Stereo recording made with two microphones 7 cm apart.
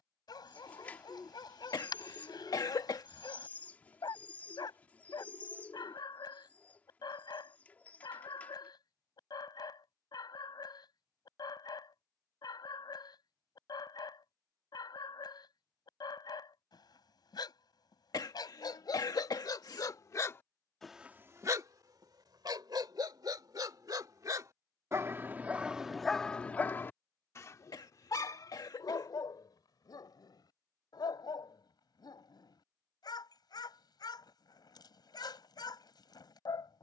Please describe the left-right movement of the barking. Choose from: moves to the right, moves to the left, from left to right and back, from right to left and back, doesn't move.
from left to right and back.